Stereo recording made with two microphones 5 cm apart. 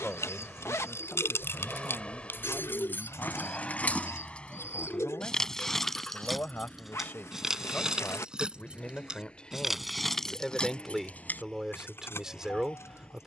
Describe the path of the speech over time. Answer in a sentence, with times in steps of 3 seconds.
You can hear the speech on the left from 0 s and in the centre from 9 s.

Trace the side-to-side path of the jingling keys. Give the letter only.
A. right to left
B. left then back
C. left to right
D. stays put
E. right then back
E.